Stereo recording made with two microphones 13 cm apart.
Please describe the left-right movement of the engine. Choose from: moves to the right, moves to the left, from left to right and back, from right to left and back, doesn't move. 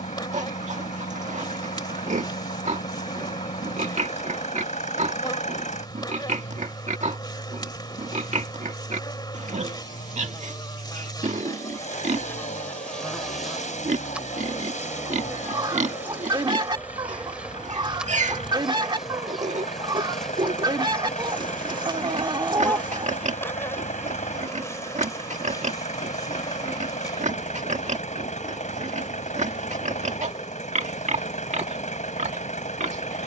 doesn't move.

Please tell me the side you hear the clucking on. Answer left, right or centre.
right.